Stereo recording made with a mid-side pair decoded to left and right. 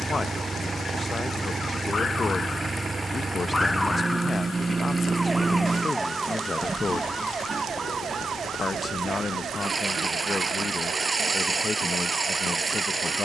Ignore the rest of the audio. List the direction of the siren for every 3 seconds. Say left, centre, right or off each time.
left, centre, right, right, right.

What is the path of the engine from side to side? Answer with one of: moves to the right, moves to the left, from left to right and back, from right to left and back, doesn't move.
doesn't move.